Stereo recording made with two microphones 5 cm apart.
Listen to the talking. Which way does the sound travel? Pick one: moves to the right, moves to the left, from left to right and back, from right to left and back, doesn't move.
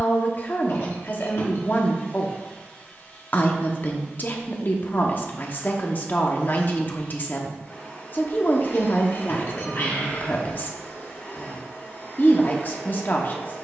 doesn't move.